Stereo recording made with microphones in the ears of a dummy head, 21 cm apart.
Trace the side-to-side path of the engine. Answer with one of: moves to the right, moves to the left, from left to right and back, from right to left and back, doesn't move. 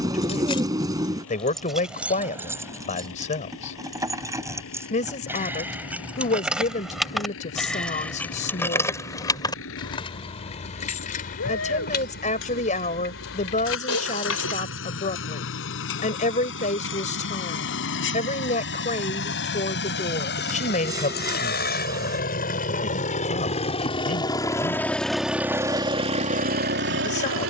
moves to the right.